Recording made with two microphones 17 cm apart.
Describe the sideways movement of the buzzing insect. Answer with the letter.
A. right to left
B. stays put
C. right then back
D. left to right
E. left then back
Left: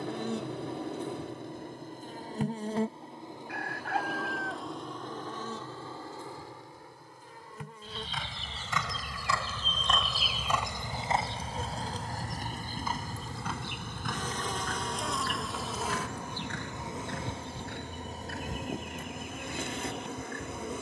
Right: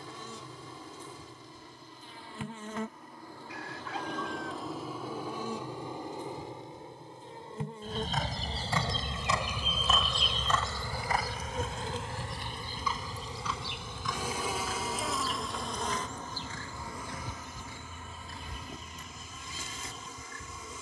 C.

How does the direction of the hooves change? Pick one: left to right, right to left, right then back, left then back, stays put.
right to left.